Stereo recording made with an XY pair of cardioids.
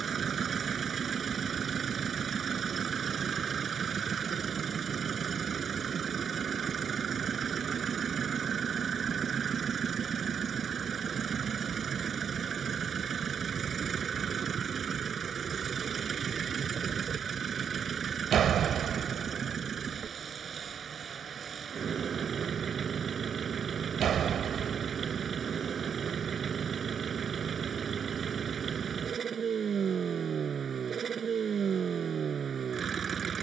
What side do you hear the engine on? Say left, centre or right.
right.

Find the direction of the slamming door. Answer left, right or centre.
right.